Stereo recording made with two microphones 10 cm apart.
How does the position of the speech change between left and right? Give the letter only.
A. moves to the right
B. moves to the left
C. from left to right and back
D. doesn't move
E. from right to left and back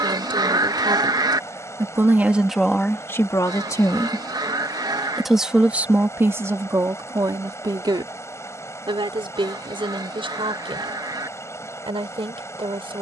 E.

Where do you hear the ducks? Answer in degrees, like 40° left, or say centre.
40° right.